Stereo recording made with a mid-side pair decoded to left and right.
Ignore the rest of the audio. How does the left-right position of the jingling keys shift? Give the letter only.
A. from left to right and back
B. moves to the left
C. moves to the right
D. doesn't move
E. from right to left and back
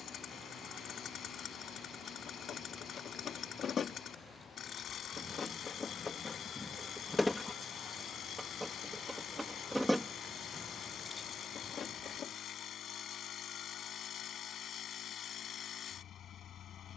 A.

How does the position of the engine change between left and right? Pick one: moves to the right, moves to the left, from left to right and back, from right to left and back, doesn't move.
doesn't move.